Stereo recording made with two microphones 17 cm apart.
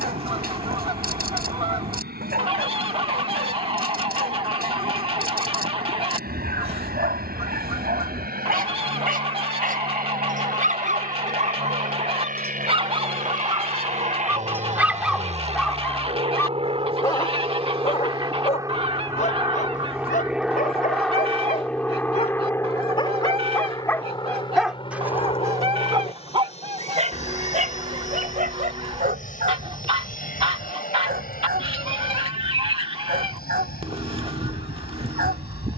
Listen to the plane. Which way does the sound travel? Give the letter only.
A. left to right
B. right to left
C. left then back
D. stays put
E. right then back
B.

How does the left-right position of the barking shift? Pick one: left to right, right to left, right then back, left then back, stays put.
left then back.